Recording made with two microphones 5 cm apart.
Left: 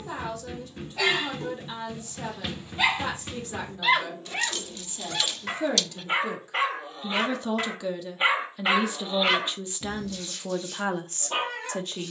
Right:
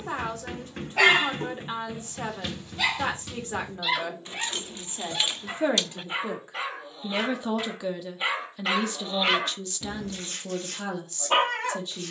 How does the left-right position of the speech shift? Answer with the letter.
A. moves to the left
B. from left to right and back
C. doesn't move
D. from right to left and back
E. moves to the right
A.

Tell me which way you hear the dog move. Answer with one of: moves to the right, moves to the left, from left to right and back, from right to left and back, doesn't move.
from right to left and back.